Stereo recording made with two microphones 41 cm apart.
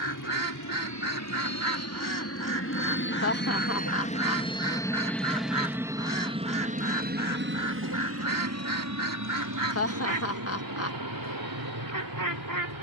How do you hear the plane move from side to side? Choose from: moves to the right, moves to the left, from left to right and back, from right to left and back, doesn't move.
moves to the right.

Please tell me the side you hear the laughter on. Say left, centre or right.
left.